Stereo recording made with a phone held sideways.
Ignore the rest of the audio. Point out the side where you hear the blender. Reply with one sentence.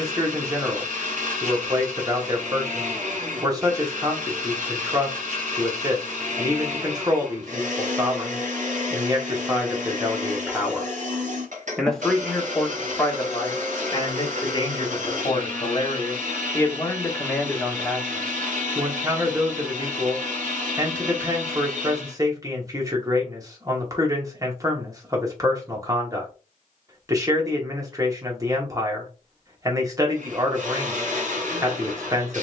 You can hear the blender on the right.